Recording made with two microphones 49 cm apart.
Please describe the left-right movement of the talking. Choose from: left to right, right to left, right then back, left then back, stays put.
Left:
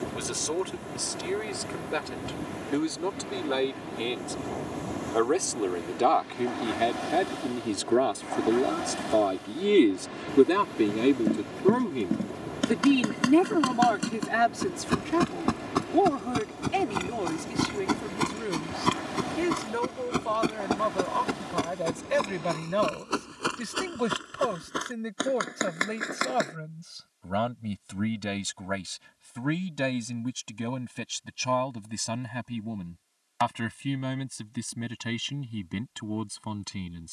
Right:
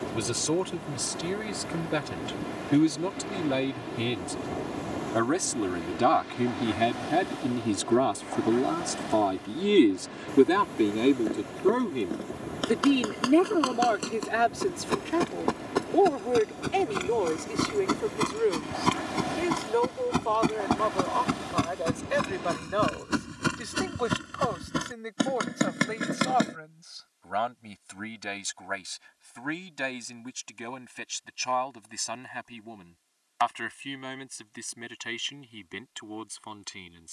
right to left.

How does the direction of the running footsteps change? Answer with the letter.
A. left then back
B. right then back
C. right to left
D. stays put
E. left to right
E.